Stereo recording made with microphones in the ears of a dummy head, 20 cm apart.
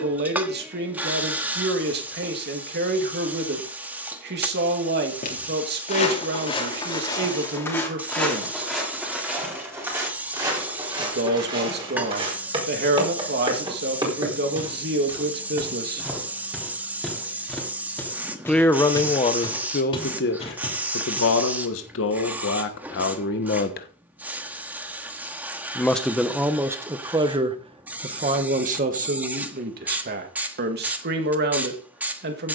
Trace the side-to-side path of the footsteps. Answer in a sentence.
You can hear the footsteps move from left to right and back again.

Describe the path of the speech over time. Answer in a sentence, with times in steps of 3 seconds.
You can hear the speech on the right from 0 s, on the left from 18 s, in the centre from 24 s and on the right from 27 s.